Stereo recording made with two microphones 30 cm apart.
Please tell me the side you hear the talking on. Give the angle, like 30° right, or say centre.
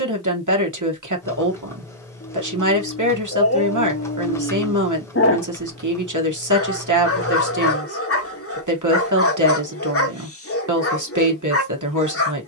70° right.